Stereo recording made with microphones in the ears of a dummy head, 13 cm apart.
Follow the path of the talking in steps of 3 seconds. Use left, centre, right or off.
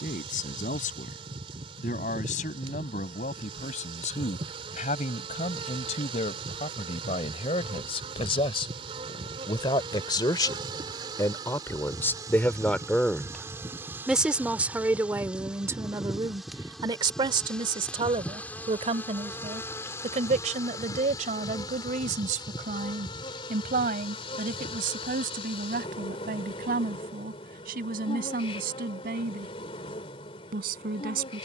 left, left, left, left, centre, right, right, right, right, right, right.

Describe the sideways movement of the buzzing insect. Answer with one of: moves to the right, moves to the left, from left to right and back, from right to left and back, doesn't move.
moves to the left.